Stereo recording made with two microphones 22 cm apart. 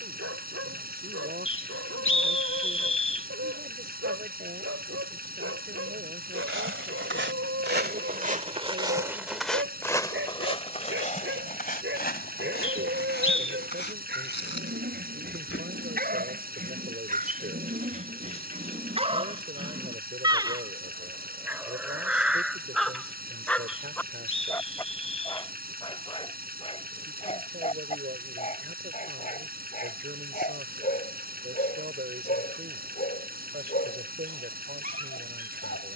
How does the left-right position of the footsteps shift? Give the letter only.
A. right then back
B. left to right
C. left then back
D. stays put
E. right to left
E.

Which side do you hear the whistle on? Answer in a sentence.
In this clip you hear the whistle on the left.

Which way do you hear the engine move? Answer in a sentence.
In this clip you hear the engine stay in one place.